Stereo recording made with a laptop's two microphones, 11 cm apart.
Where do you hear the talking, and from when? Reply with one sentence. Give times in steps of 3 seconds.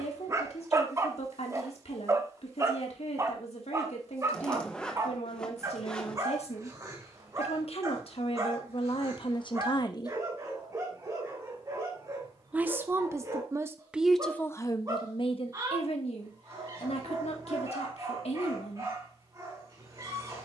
In this clip you hear the talking on the left from 0 s, in the centre from 12 s and on the left from 15 s.